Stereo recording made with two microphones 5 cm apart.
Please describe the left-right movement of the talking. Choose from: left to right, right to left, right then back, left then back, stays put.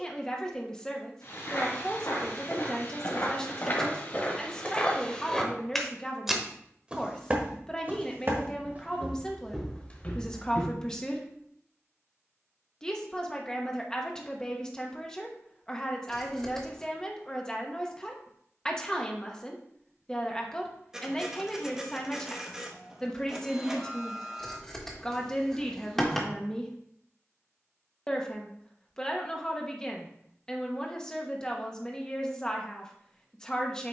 stays put.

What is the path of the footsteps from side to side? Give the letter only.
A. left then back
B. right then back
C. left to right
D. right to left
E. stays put
B.